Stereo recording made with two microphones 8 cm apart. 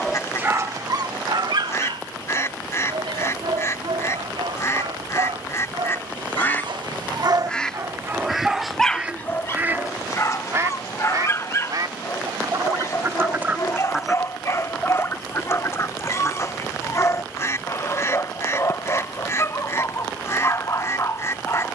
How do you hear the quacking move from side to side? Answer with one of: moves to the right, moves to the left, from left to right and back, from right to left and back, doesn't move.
from left to right and back.